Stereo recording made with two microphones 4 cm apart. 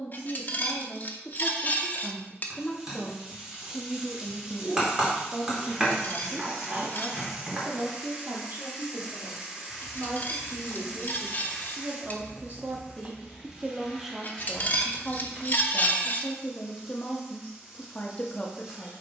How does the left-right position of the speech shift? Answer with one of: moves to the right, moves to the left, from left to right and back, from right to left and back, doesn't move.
from left to right and back.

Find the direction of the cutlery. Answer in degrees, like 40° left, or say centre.
40° left.